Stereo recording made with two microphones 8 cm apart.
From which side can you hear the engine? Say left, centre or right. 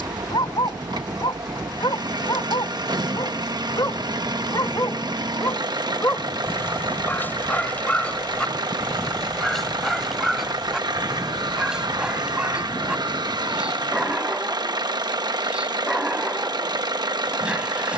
right.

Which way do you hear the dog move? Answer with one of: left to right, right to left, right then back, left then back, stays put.
left to right.